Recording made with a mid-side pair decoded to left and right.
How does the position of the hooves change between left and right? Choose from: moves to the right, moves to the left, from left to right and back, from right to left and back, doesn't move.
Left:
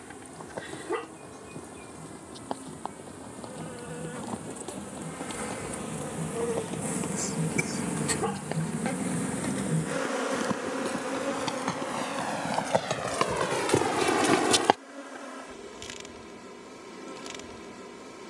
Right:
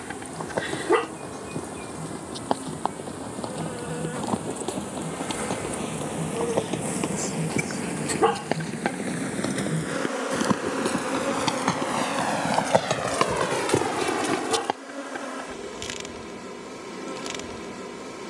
moves to the left.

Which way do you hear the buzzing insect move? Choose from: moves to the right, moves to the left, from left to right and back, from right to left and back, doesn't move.
from right to left and back.